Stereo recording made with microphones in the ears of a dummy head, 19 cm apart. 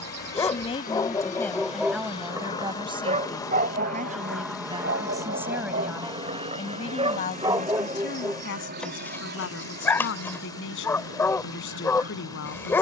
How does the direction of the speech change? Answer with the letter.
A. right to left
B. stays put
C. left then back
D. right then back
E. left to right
D.